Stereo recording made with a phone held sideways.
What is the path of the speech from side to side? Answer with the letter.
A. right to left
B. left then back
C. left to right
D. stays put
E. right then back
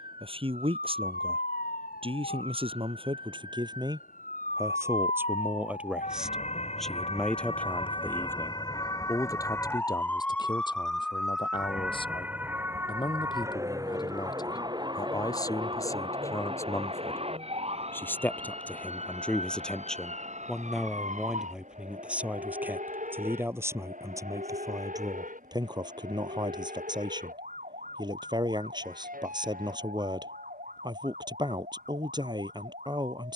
B.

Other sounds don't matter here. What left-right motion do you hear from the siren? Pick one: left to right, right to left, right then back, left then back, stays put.
left to right.